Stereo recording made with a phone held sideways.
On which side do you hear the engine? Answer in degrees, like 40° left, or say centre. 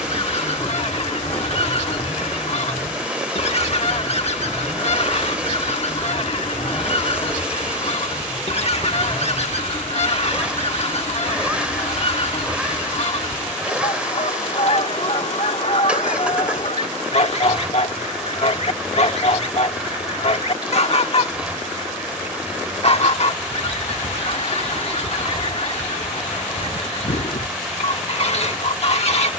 10° right.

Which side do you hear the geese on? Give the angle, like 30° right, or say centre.
50° left.